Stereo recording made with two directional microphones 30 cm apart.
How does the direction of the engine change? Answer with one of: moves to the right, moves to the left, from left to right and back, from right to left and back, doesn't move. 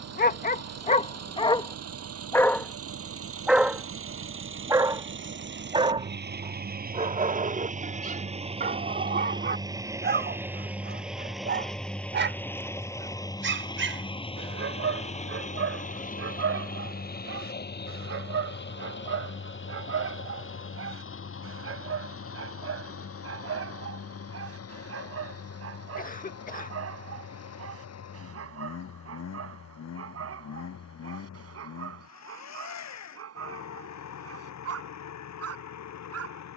moves to the left.